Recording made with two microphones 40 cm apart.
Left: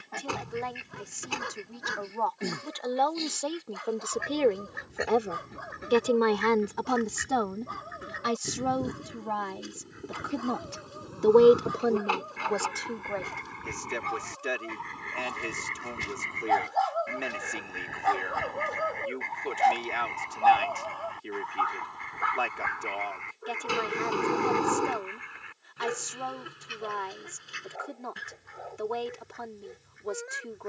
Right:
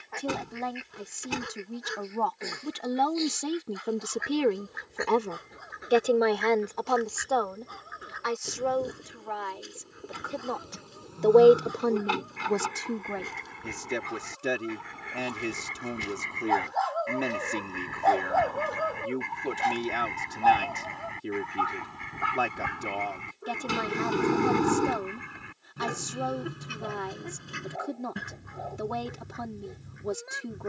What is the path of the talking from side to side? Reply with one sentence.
In this clip you hear the talking move from right to left and back again.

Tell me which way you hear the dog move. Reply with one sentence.
In this clip you hear the dog move from left to right.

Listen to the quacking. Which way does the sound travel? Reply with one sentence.
You can hear the quacking travel towards the right.